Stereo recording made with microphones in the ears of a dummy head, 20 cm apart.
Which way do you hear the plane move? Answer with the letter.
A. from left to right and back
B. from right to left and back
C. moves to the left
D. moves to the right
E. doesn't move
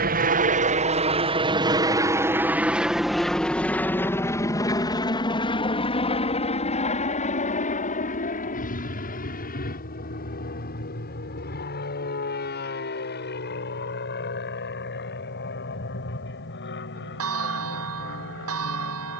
C.